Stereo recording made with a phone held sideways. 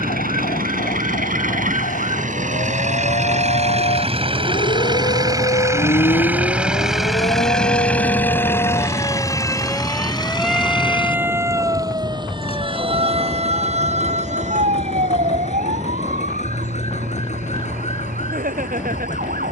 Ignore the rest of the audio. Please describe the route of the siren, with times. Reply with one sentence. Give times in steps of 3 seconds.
You can hear the siren on the left from 0 s, in the centre from 9 s and on the right from 12 s.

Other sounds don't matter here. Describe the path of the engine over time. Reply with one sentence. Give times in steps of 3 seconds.
In this clip you hear the engine on the right from 0 s, in the centre from 6 s and on the left from 9 s.